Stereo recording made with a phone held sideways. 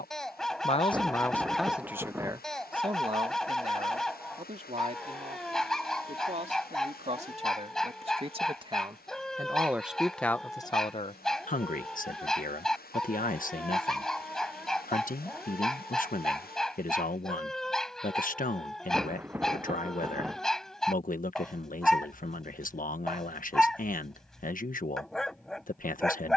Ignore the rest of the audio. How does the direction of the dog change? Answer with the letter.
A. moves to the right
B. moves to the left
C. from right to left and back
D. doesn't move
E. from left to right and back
D.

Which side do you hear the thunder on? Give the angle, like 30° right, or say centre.
10° right.